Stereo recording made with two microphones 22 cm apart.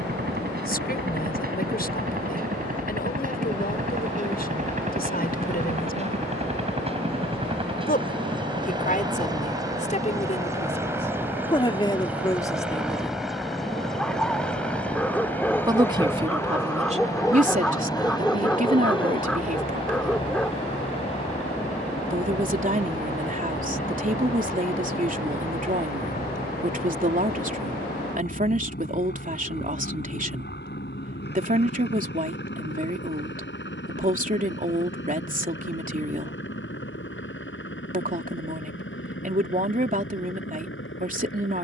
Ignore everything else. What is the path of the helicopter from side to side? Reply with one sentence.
You can hear the helicopter move from right to left.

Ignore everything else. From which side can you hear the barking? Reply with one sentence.
You can hear the barking in the centre.